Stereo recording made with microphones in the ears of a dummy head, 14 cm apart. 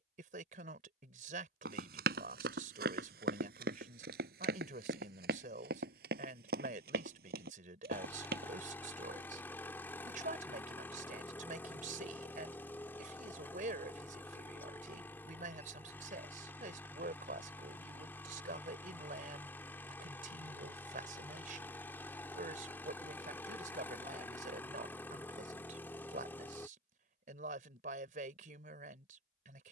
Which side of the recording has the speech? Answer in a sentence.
You can hear the speech on the right.